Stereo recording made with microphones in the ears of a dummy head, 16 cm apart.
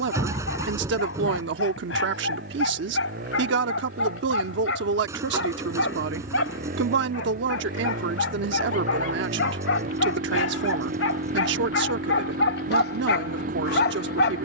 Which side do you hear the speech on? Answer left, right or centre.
right.